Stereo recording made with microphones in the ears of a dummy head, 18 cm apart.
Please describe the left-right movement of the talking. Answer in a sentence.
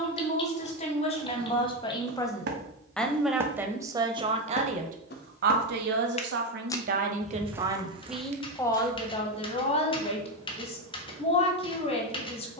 You can hear the talking move from left to right and back again.